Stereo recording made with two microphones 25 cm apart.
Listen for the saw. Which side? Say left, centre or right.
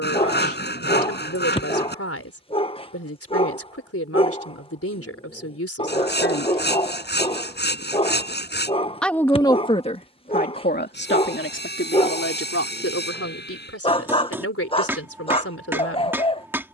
left.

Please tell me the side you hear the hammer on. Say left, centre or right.
centre.